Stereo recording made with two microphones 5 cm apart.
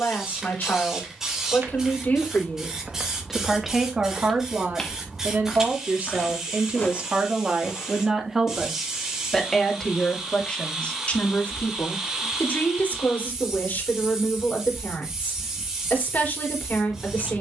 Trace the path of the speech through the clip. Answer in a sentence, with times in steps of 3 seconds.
You can hear the speech on the left from 0 s, on the right from 3 s and on the left from 9 s.